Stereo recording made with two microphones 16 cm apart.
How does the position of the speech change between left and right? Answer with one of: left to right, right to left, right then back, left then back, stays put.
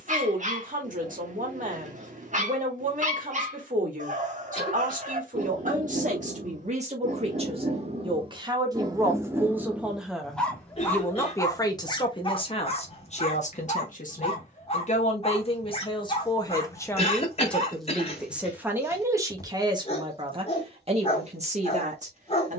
left then back.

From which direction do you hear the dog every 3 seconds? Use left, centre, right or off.
right, right, right, centre, left, left, left, left.